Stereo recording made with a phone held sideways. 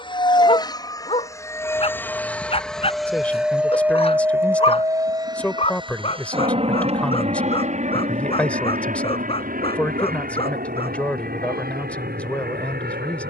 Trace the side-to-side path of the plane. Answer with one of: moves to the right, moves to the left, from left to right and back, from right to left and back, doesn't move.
moves to the right.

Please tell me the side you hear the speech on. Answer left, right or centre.
centre.